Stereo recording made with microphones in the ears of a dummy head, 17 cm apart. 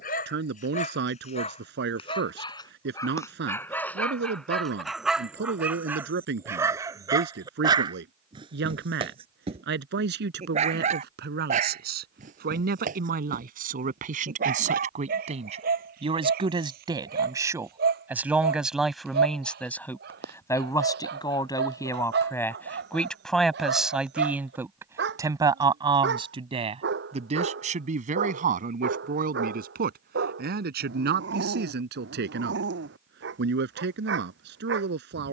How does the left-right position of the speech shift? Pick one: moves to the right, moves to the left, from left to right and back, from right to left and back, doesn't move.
from right to left and back.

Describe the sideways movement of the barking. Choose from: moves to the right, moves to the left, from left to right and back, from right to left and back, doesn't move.
moves to the right.